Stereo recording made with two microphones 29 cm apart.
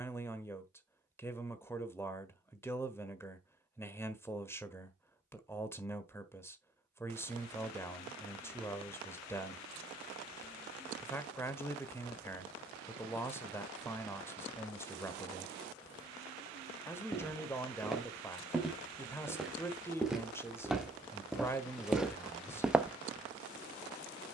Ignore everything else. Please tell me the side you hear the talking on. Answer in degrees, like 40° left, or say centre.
10° left.